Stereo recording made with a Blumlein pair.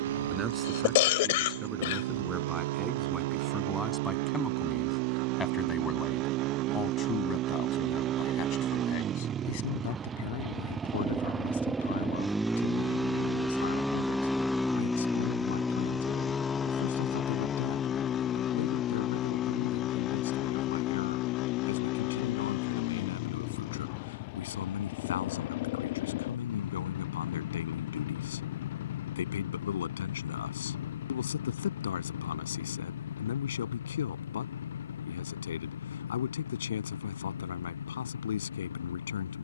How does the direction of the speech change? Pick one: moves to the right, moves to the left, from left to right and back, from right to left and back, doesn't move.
moves to the left.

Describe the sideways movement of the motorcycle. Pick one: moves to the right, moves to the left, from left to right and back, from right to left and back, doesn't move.
moves to the left.